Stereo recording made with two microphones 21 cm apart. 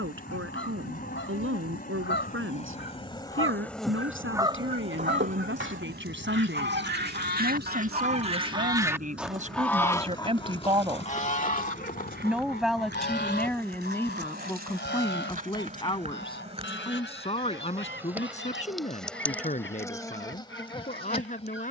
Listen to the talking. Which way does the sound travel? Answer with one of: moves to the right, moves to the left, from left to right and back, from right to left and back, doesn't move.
moves to the left.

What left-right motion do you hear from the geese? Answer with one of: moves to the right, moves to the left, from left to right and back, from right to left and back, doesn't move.
from left to right and back.